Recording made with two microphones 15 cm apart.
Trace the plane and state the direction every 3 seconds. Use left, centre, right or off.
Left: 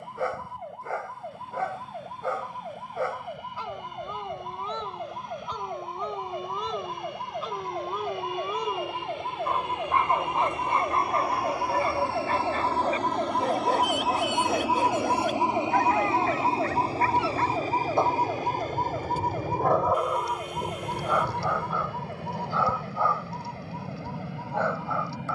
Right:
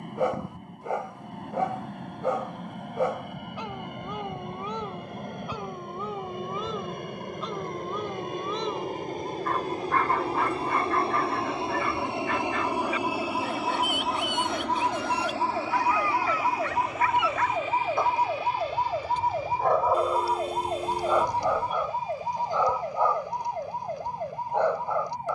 right, right, right, right, centre, left, left, left, left.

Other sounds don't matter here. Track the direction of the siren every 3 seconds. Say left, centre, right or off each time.
left, left, left, left, left, centre, right, right, right.